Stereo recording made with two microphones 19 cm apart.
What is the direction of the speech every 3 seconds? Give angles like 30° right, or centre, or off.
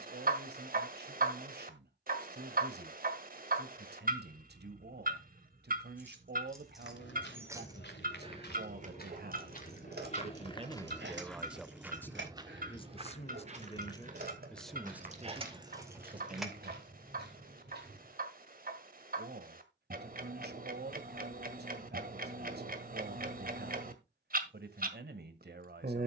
60° right, 60° right, 60° right, 30° right, 20° left, 30° right, 60° right, 60° right, 60° right.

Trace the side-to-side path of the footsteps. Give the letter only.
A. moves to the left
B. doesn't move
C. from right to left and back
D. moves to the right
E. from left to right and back
D.